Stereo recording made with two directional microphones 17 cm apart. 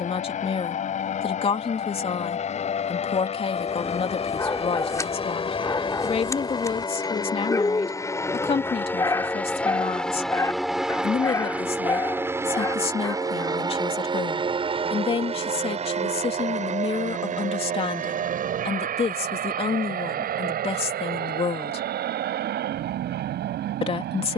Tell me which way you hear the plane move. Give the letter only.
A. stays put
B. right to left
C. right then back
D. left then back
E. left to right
E.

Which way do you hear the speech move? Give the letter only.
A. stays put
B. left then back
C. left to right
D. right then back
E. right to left
A.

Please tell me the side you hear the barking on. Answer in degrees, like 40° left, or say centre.
20° left.